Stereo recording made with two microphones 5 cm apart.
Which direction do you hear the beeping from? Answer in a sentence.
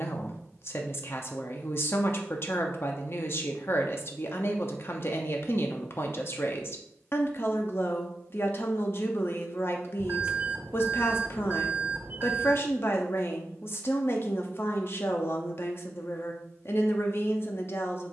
You can hear the beeping on the right.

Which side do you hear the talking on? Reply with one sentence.
You can hear the talking on the left.